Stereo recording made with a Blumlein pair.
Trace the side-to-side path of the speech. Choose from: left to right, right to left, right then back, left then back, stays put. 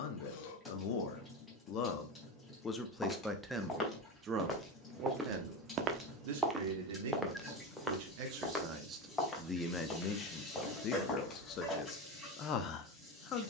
right then back.